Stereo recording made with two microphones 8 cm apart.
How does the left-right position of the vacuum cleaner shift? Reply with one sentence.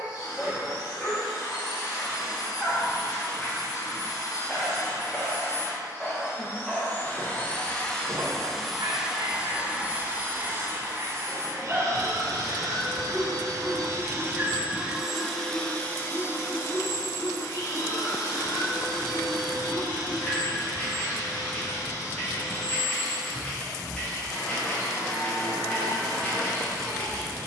You can hear the vacuum cleaner move from left to right and back again.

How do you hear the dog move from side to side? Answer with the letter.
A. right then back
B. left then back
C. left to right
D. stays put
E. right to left
A.